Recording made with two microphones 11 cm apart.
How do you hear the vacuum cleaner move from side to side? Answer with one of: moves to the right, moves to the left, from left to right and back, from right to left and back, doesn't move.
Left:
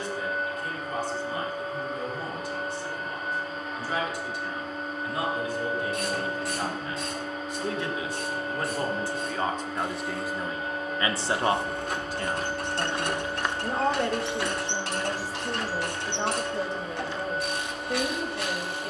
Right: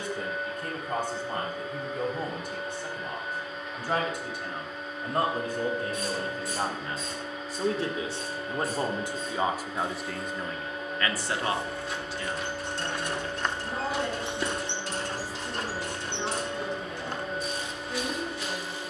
doesn't move.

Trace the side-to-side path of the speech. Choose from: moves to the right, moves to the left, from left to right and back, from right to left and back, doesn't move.
moves to the left.